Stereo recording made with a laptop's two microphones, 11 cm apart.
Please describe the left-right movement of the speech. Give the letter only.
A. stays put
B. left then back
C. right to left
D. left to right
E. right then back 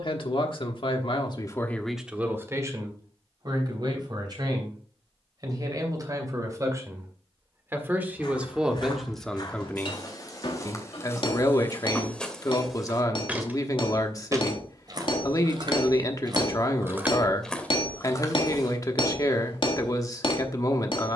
E.